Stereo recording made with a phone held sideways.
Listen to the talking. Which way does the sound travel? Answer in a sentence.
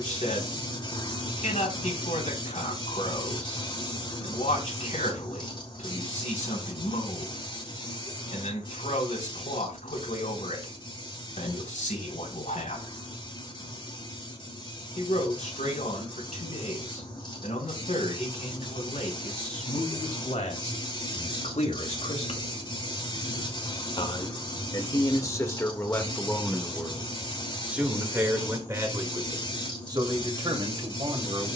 You can hear the talking go from the left side to the right.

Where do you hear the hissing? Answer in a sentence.
You can hear the hissing on the left.